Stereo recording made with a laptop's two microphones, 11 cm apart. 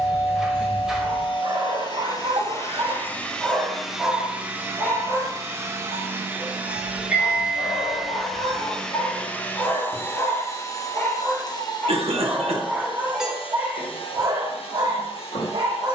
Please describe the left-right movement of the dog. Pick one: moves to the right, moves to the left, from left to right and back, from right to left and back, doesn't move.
from right to left and back.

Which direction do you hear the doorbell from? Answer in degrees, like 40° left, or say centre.
centre.